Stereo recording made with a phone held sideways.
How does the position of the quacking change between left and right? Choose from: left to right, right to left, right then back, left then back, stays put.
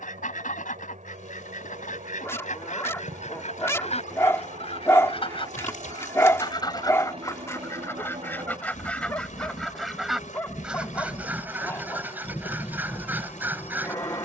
left to right.